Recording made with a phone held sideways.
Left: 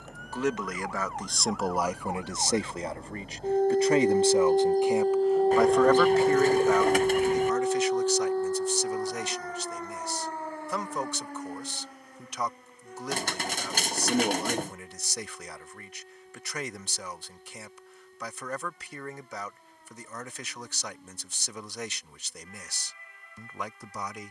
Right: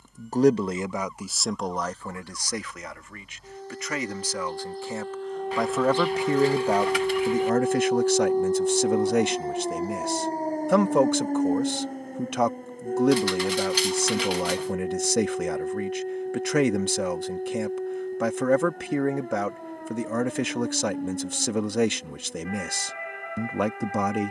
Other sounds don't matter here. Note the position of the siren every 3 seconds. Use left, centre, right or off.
left, left, centre, right, right, right, right, right.